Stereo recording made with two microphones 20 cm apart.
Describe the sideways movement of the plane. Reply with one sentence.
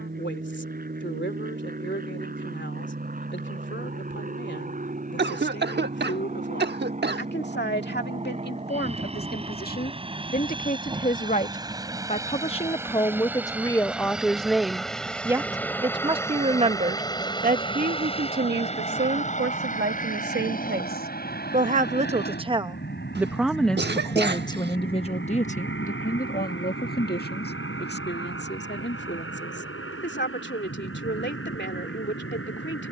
You can hear the plane go from the right side to the left.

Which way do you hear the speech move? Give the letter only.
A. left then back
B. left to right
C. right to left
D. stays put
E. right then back
E.